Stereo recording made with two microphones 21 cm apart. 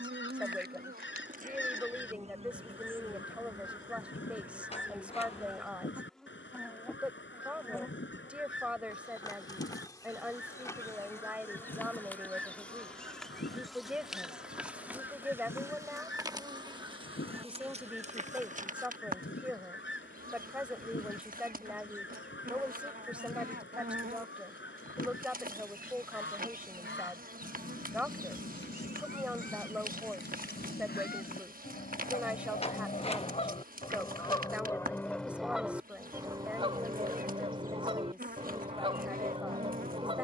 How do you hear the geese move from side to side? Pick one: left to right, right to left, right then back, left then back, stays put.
left to right.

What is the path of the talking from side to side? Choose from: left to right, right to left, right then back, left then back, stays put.
stays put.